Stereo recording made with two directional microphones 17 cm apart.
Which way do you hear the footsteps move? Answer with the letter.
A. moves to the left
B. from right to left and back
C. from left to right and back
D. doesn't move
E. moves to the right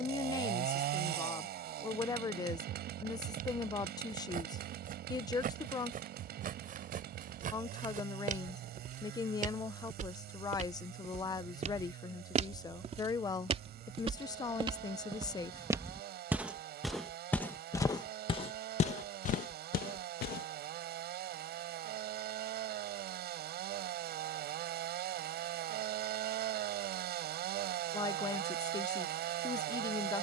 A.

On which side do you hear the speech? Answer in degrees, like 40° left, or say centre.
20° left.